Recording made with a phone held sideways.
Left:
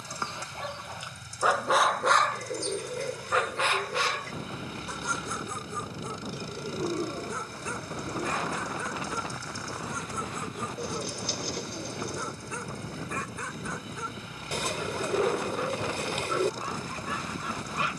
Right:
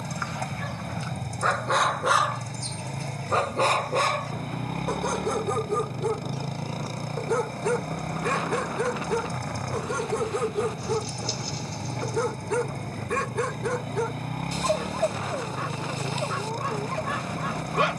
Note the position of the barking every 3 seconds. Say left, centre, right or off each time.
centre, right, right, right, right, right.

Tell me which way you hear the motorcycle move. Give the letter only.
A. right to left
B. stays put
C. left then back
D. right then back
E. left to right
B.